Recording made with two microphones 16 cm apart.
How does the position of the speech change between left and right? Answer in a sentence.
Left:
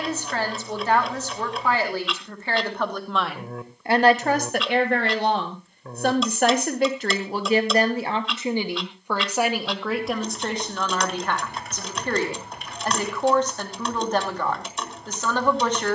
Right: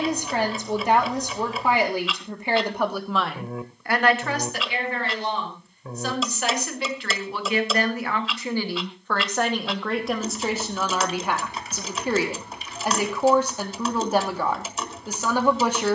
You can hear the speech go left and come back.